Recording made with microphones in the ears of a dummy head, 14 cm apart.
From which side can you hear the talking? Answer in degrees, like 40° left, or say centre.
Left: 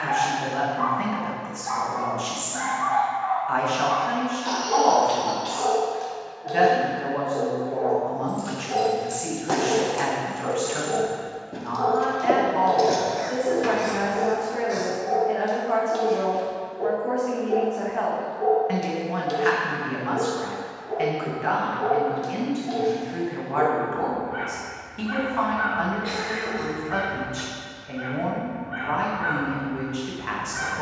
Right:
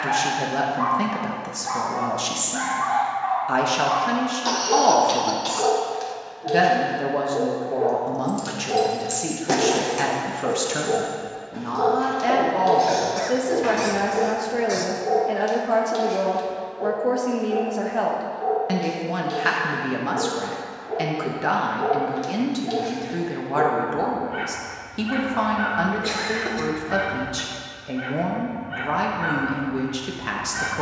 40° right.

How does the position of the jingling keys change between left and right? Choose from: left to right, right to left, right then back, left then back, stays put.
right to left.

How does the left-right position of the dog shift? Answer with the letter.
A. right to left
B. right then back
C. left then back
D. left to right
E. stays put
C.